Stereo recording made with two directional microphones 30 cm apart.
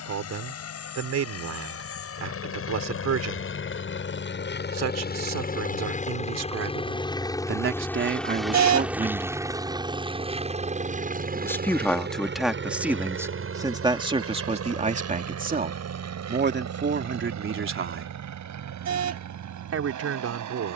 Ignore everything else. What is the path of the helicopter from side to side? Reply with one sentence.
In this clip you hear the helicopter go from the left side to the right.